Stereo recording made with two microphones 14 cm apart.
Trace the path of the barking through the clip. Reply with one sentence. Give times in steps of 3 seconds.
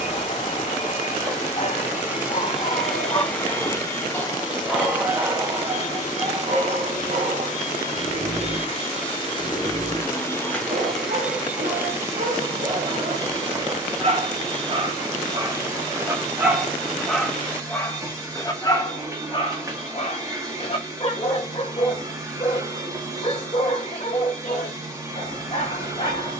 You can hear the barking on the left from 0 s, in the centre from 3 s, on the right from 6 s, in the centre from 15 s and on the left from 18 s.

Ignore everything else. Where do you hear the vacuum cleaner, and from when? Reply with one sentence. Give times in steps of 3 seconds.
You can hear the vacuum cleaner in the centre from 0 s, on the left from 3 s, in the centre from 9 s and on the right from 12 s.